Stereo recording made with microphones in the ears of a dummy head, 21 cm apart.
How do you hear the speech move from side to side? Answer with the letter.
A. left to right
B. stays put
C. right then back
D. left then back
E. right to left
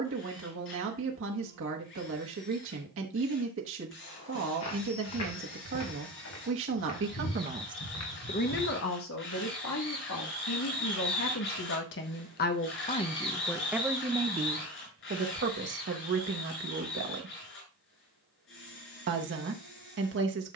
D.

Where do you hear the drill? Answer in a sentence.
In this clip you hear the drill on the left.